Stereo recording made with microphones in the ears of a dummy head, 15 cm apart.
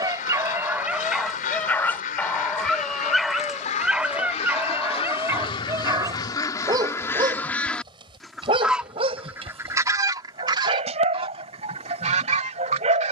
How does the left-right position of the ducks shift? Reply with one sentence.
In this clip you hear the ducks travel towards the right.